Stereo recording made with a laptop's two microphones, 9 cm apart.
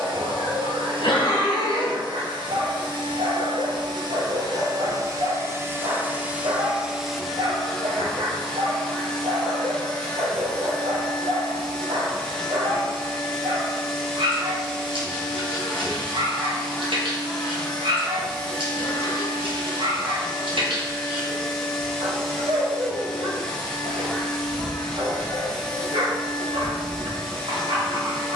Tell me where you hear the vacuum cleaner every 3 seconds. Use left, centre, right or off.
right, right, centre, centre, centre, centre, centre, centre, centre, centre.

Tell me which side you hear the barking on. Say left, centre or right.
right.